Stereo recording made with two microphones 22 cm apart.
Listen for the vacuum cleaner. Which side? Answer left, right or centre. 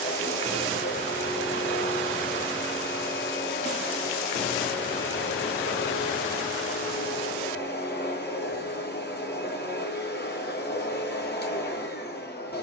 left.